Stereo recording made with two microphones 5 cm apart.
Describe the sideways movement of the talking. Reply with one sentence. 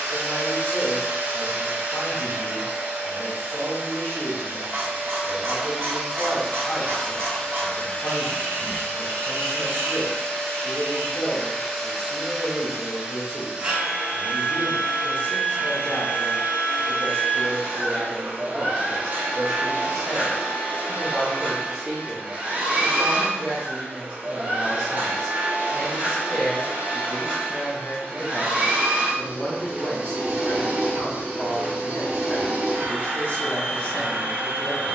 In this clip you hear the talking move from left to right and back again.